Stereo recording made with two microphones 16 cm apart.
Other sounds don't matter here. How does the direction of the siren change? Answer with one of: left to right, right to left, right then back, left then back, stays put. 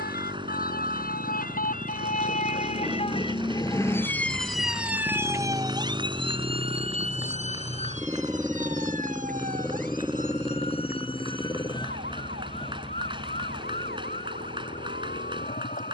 left to right.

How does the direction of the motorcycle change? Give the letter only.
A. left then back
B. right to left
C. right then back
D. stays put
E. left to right
B.